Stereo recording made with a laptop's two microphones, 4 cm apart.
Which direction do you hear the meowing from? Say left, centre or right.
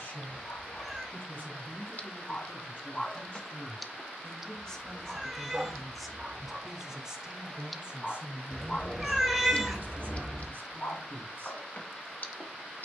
centre.